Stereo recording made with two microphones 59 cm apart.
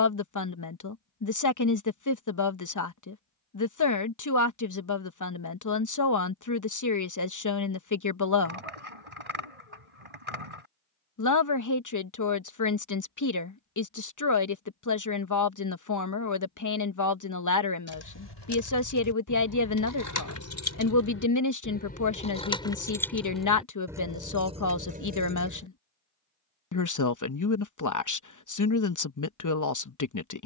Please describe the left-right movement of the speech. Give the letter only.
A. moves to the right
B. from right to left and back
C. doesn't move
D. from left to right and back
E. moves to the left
C.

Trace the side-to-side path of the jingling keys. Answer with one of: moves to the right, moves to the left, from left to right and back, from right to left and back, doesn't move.
moves to the right.